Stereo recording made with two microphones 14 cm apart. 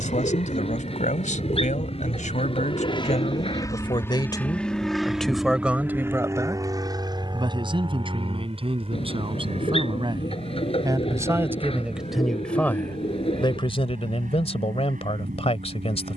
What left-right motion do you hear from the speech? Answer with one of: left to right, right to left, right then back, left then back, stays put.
right then back.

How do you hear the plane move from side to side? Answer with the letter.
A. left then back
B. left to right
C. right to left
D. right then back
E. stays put
B.